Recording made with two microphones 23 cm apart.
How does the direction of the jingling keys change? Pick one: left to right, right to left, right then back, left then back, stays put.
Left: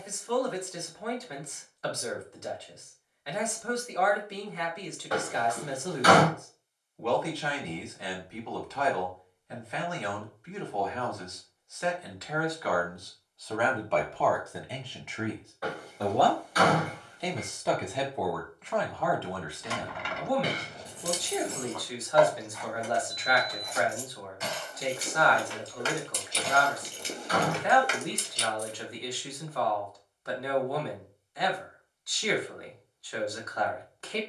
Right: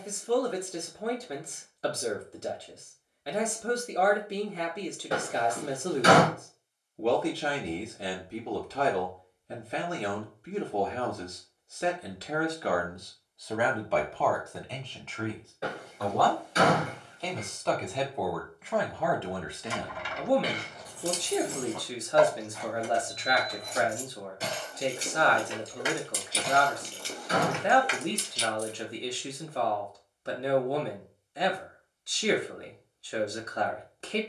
right then back.